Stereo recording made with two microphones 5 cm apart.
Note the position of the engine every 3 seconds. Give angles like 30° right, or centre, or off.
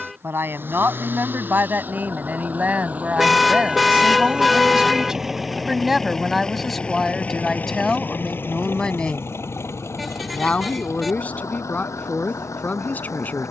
40° right, 20° right, 30° left, 60° left, 80° left.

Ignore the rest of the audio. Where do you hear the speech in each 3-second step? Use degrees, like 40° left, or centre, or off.
40° right, 20° right, 10° left, 30° left, 30° left.